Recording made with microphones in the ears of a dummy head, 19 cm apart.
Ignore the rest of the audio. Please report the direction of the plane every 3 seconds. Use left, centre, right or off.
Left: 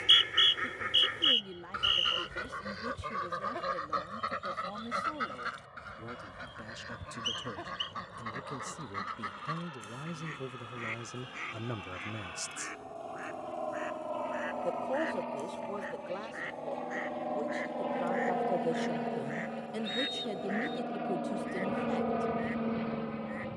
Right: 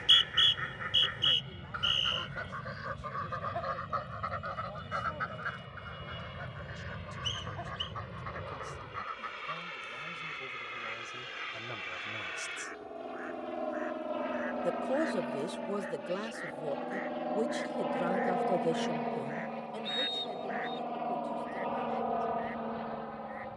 right, right, right, right, right, centre, centre, left.